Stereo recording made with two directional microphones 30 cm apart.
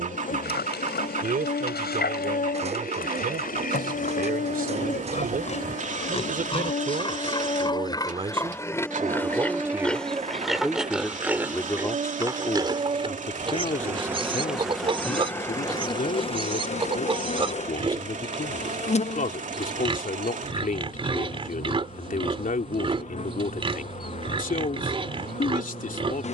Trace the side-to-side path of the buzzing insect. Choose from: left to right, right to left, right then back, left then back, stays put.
right then back.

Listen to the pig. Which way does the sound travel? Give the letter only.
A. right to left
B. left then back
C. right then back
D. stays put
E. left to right
E.